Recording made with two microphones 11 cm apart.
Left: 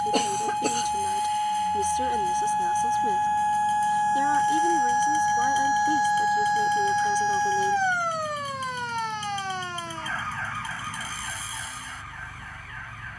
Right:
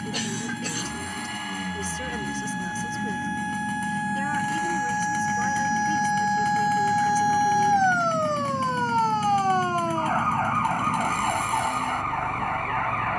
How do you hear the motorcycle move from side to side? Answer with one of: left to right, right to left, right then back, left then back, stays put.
stays put.